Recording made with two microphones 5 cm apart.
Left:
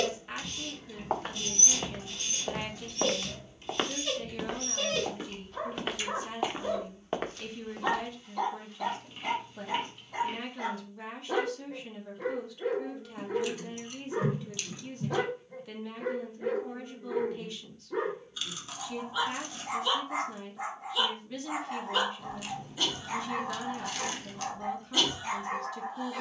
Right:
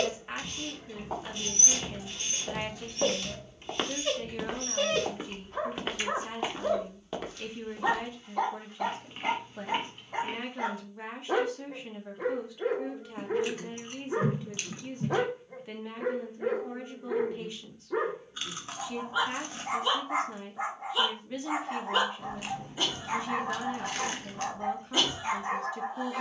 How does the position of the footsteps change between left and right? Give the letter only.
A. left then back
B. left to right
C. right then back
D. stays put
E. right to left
C.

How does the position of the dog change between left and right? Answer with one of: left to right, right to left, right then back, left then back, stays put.
stays put.